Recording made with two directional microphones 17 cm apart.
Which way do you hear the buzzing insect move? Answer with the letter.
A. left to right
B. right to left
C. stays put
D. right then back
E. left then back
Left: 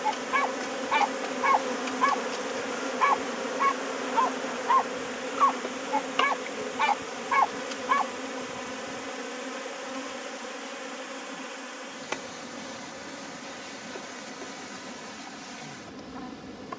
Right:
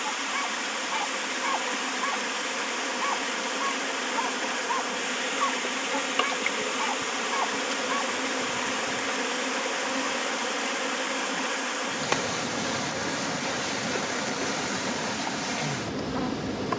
A.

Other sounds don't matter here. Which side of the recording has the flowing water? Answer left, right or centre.
right.